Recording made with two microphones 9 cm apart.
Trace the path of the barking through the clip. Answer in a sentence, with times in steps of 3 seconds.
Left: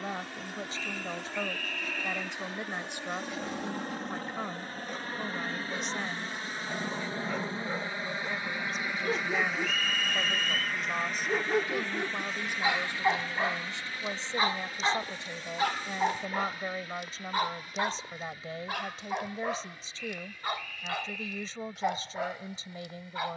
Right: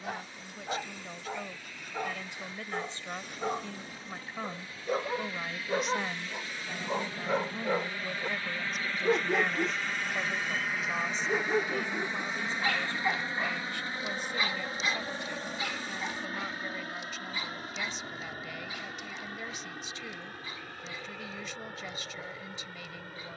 In this clip you hear the barking on the right from 0 s, in the centre from 9 s and on the left from 12 s.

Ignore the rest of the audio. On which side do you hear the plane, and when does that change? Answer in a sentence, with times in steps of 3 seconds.
You can hear the plane on the left from 0 s, in the centre from 9 s and on the right from 12 s.